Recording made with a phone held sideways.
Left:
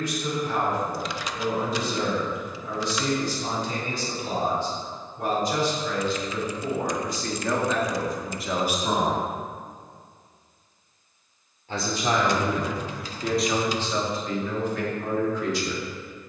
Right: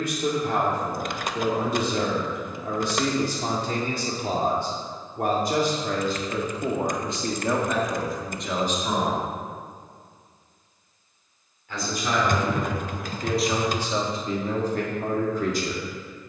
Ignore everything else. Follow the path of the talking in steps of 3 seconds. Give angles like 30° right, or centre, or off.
60° right, 60° right, 20° right, 30° left, 10° right, 50° right.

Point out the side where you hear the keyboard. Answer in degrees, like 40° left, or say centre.
50° right.